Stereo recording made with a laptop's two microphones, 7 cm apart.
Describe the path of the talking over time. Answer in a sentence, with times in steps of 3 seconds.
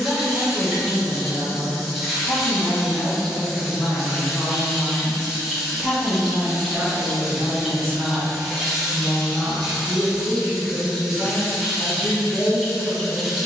You can hear the talking on the left from 0 s, in the centre from 3 s, on the right from 6 s and on the left from 9 s.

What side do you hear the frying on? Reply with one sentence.
In this clip you hear the frying in the centre.